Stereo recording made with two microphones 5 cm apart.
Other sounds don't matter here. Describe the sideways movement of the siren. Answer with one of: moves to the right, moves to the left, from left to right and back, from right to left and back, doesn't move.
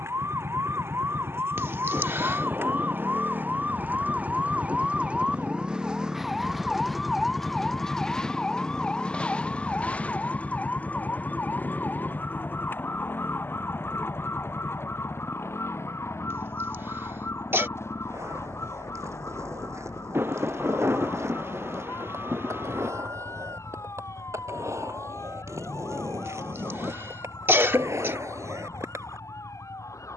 moves to the left.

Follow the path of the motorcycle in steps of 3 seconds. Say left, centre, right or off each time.
right, right, centre, left, left, left, left, left, left, left.